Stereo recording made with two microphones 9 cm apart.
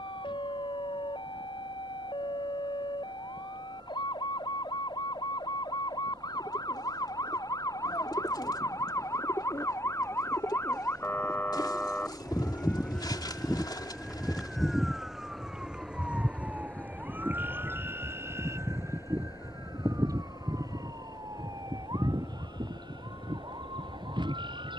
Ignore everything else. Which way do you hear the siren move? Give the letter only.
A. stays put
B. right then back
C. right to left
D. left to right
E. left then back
D.